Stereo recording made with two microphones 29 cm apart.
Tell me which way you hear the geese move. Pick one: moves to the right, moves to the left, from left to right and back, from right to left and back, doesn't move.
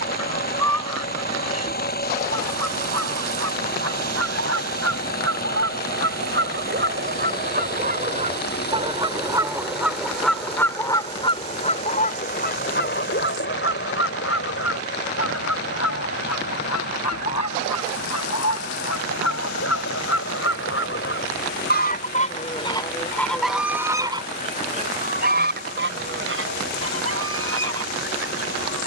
from right to left and back.